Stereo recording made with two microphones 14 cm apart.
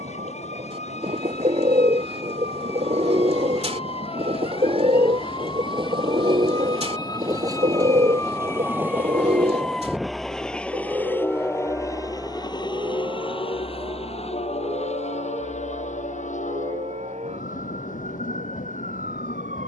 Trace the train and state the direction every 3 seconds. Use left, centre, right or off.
right, right, right, centre, left, left, left.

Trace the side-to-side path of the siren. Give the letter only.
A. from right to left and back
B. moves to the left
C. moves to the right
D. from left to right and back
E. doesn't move
C.